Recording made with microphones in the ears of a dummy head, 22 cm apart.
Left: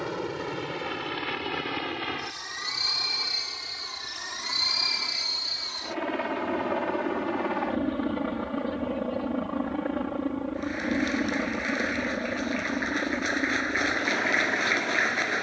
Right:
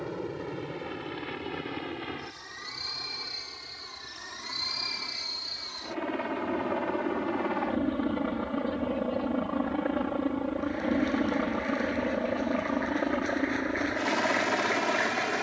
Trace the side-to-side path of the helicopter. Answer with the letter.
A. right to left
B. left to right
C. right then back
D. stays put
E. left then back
B.